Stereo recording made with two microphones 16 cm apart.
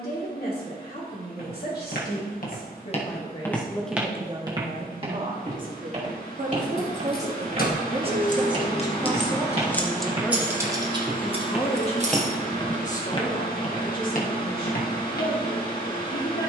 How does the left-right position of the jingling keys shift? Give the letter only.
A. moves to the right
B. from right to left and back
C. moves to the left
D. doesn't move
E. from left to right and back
A.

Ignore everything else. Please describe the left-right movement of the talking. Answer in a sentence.
In this clip you hear the talking move from left to right and back again.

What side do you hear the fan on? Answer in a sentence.
In this clip you hear the fan on the left.